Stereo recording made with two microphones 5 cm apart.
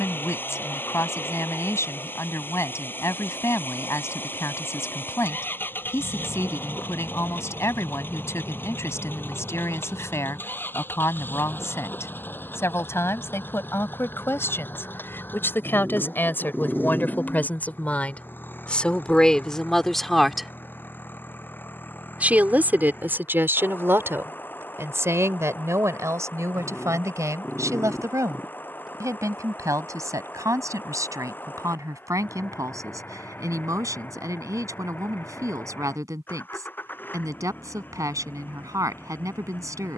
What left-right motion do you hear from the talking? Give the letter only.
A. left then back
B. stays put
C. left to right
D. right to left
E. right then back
C.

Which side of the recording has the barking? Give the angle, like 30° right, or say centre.
10° right.